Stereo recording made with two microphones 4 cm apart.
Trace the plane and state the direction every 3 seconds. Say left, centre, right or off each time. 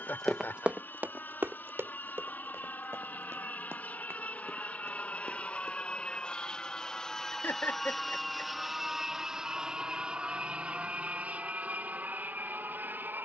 left, left, centre, right, right.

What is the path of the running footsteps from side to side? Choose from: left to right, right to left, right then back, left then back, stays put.
left to right.